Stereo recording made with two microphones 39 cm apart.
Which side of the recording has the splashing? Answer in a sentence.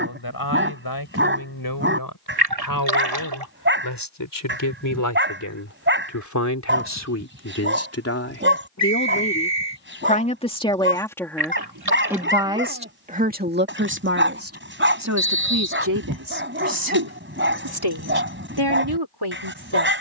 You can hear the splashing on the right.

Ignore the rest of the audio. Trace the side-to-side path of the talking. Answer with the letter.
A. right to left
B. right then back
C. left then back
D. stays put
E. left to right
E.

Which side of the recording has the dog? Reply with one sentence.
In this clip you hear the dog on the right.